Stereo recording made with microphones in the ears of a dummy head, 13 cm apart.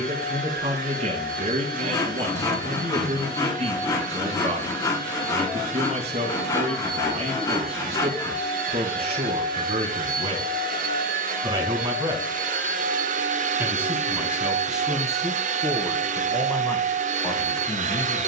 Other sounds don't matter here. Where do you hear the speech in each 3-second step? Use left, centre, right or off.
right, right, right, right, centre, centre.